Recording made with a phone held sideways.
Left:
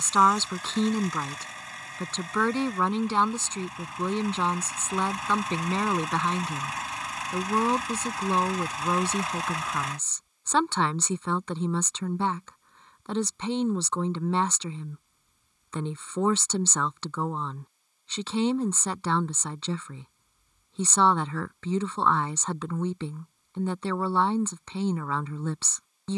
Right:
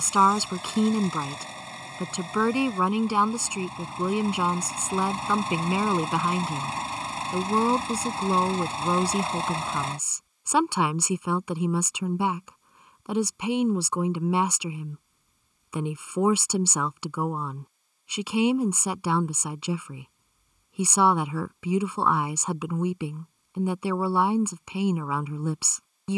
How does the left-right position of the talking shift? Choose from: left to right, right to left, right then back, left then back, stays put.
stays put.